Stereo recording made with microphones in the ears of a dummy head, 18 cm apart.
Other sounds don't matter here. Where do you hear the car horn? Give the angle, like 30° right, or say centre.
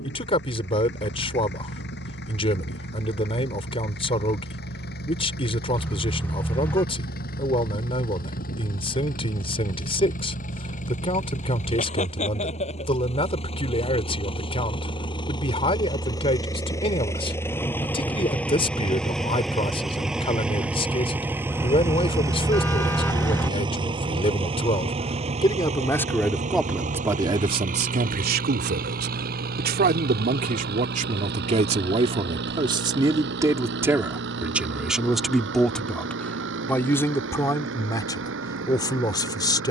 10° left.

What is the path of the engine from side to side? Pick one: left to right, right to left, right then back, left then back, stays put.
left to right.